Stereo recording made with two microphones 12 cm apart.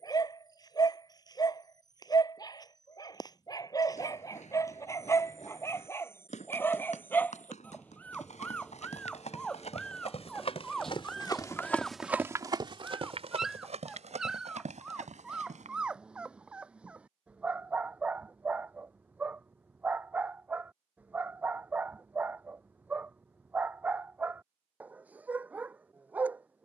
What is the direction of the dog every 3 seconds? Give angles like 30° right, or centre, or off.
30° left, 30° left, 10° left, centre, centre, 10° right, 10° right, 10° right, 10° right.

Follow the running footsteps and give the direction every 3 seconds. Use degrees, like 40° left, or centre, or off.
off, 80° left, 80° left, 50° left, 60° right, 80° right, off, off, off.